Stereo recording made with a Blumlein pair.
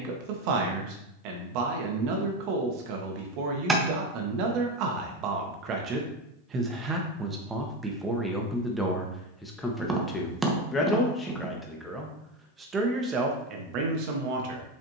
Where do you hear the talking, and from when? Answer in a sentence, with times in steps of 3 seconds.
In this clip you hear the talking on the right from 0 s, in the centre from 6 s and on the right from 12 s.